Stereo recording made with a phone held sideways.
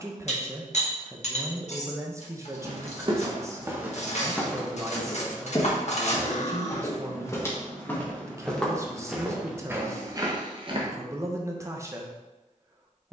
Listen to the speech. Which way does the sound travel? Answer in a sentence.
In this clip you hear the speech stay put.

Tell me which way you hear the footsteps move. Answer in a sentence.
In this clip you hear the footsteps go left and come back.